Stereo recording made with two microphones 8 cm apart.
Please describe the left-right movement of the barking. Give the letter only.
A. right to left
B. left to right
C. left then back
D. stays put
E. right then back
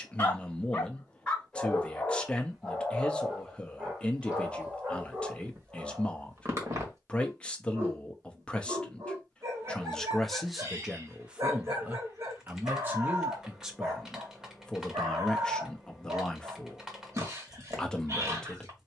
B.